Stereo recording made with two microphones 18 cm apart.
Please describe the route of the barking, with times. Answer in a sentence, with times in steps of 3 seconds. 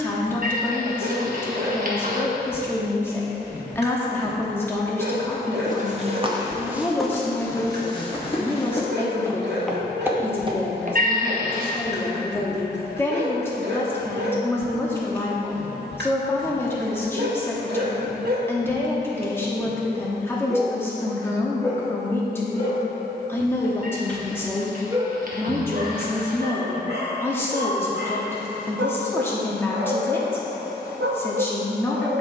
In this clip you hear the barking on the right from 0 s, on the left from 21 s and on the right from 24 s.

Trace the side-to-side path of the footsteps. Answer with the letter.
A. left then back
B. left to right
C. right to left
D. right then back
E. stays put
A.